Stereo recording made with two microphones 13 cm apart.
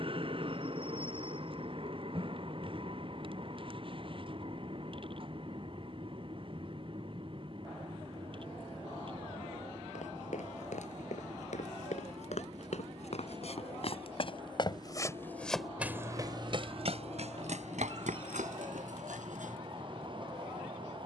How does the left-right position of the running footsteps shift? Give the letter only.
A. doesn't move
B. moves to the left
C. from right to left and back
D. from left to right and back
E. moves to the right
E.